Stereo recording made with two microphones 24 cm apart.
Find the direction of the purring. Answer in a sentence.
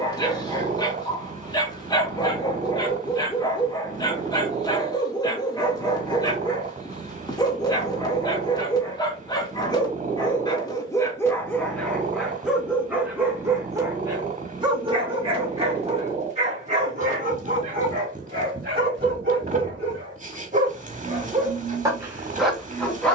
In this clip you hear the purring on the right.